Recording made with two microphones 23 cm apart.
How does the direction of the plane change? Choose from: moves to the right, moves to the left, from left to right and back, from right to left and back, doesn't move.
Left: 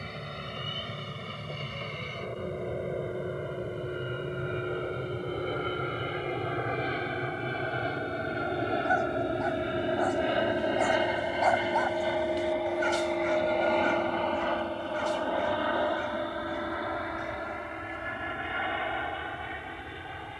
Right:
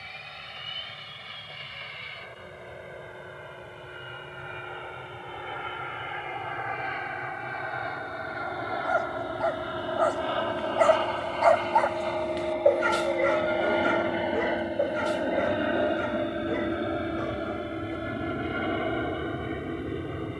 moves to the right.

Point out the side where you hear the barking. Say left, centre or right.
right.